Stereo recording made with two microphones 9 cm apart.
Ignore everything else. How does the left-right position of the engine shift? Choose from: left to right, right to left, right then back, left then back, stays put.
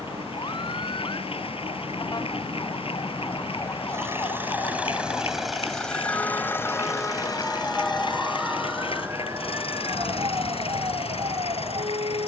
right to left.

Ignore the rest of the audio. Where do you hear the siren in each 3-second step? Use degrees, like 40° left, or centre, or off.
50° left, 40° left, 10° left, 40° right.